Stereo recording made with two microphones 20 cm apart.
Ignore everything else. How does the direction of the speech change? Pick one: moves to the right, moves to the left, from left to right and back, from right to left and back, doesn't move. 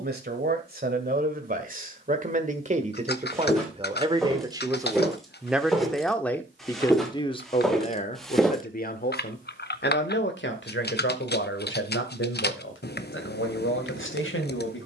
moves to the left.